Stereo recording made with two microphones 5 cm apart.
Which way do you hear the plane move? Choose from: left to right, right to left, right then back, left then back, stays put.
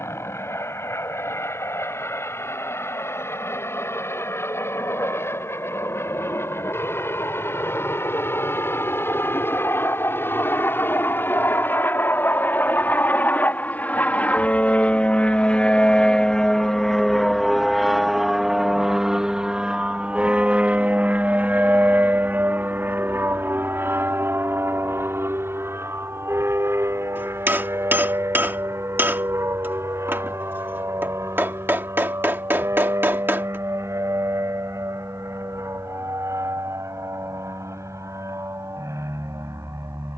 left to right.